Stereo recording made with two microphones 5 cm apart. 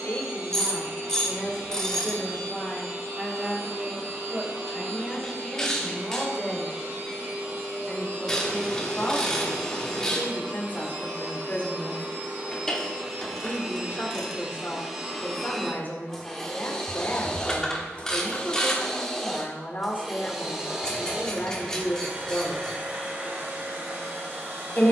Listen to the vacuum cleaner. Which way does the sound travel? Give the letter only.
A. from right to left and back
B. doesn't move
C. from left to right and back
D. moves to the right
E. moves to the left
A.